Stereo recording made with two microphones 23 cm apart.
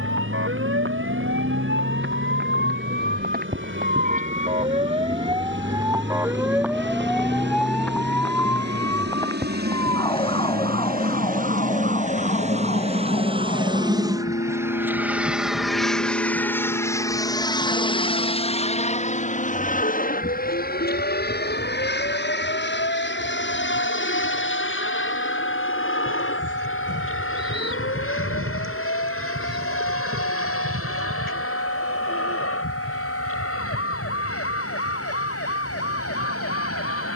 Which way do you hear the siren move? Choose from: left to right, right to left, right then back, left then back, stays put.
right to left.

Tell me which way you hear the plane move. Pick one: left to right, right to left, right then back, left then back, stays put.
right to left.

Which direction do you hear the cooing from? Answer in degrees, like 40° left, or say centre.
60° right.